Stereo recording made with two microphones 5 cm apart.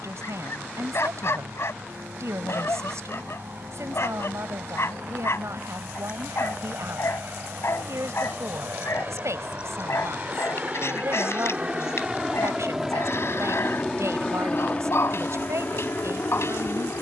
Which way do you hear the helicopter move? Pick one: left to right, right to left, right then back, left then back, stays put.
right to left.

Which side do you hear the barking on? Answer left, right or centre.
left.